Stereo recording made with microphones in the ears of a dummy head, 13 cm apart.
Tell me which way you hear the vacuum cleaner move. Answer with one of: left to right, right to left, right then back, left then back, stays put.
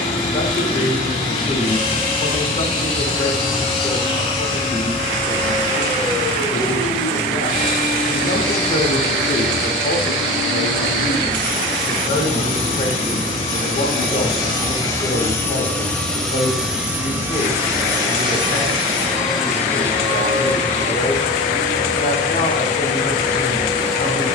left to right.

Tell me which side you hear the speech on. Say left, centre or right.
left.